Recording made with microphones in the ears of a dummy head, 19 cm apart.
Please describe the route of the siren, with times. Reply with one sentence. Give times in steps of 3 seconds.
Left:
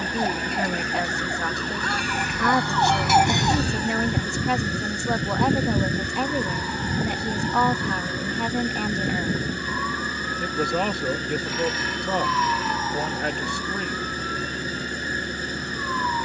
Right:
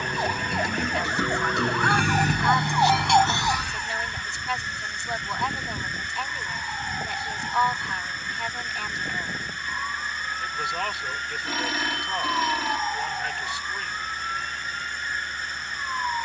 In this clip you hear the siren on the right from 0 s and on the left from 3 s.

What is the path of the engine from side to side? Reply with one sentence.
In this clip you hear the engine stay in one place.